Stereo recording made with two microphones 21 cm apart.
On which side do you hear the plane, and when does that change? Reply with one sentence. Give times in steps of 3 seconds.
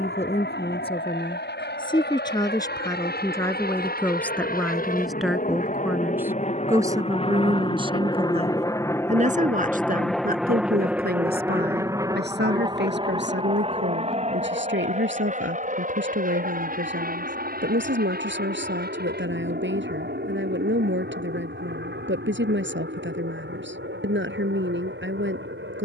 You can hear the plane on the left from 0 s, in the centre from 9 s and on the right from 12 s.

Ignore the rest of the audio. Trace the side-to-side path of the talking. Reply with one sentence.
In this clip you hear the talking go from the left side to the right.